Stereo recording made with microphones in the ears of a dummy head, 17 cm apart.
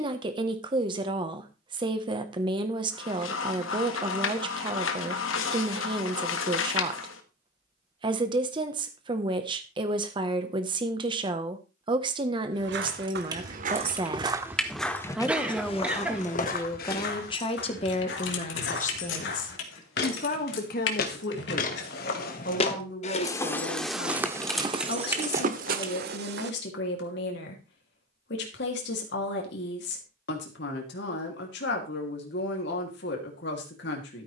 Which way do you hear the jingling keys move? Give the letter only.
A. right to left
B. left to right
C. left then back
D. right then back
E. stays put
C.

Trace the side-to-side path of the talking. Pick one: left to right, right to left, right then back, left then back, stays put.
right to left.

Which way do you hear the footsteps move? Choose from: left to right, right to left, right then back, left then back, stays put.
left then back.